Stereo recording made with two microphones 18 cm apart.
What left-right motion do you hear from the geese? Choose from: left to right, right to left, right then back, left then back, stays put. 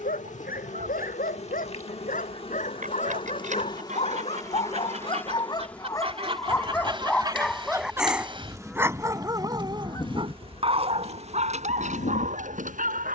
right to left.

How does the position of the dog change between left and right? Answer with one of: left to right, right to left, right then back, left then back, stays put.
left to right.